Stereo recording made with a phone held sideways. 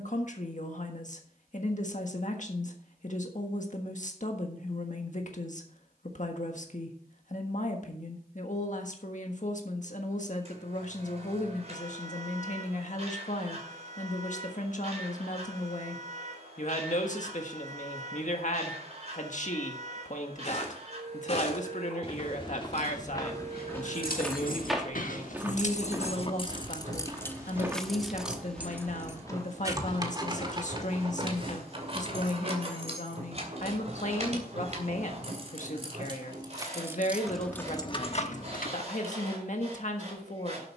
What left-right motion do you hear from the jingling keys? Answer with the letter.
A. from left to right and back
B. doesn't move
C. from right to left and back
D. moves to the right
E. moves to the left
A.